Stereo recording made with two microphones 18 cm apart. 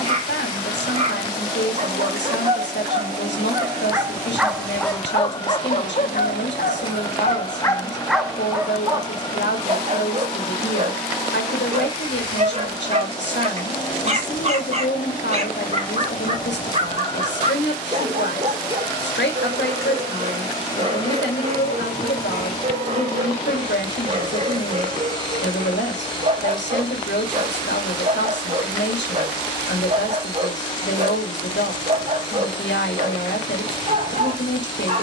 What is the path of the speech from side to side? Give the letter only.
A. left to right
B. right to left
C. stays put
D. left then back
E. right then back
C.